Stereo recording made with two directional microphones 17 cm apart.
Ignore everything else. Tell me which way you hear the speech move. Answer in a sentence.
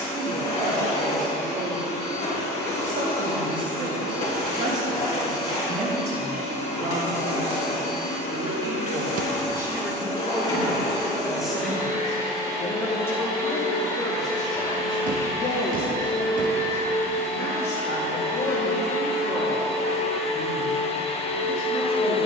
You can hear the speech travel towards the left.